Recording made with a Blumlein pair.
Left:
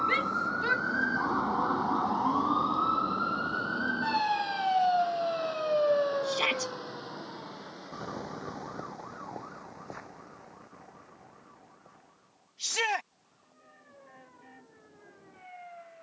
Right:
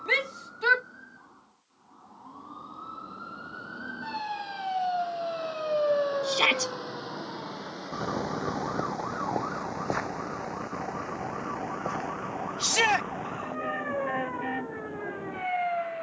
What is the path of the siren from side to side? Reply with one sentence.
You can hear the siren go from the left side to the right.